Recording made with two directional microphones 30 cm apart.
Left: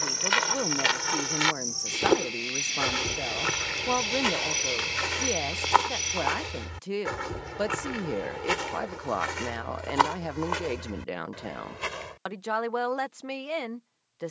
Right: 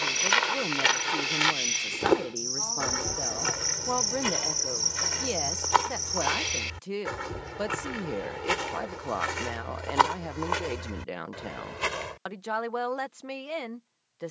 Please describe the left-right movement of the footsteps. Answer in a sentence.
You can hear the footsteps go left and come back.